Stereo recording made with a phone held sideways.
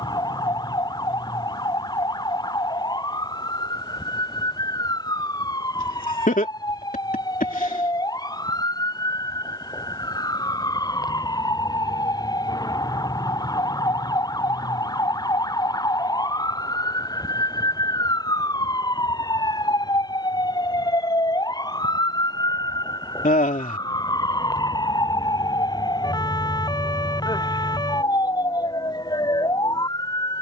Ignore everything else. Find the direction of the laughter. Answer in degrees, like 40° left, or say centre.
60° left.